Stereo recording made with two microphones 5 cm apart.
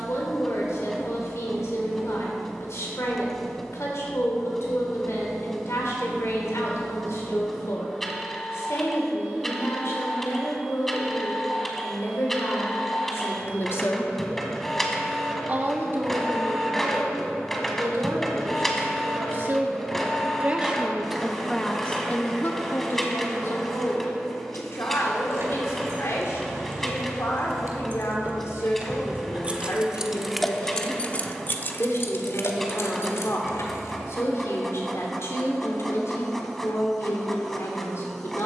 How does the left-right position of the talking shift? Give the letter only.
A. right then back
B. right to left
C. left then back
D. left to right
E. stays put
A.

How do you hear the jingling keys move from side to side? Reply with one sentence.
You can hear the jingling keys move from right to left.